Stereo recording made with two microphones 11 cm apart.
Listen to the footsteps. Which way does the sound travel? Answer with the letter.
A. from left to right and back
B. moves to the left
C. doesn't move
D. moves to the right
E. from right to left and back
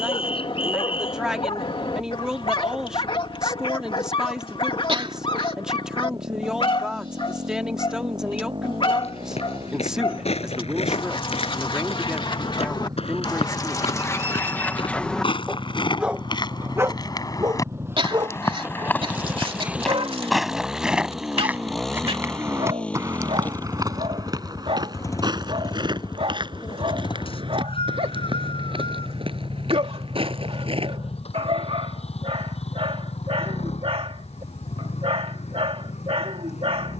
D.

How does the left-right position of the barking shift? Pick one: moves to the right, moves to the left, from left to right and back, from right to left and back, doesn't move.
moves to the right.